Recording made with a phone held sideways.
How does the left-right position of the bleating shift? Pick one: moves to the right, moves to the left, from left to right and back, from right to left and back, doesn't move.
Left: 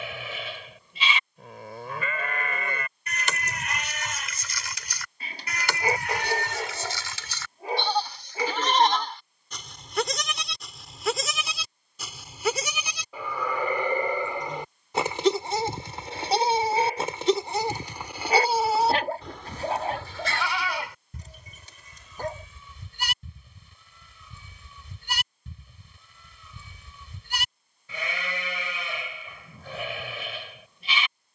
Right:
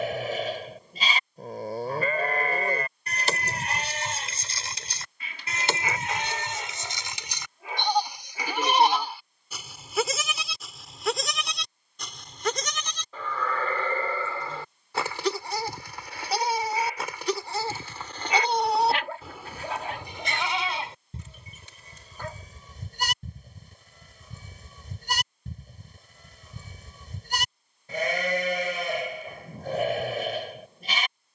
from right to left and back.